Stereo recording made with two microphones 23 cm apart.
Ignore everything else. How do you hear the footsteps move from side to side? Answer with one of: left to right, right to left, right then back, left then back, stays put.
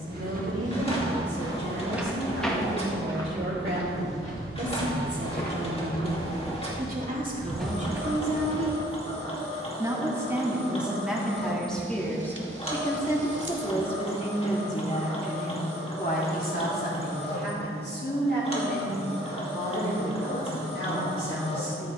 left then back.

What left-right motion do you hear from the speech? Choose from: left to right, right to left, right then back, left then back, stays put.
right to left.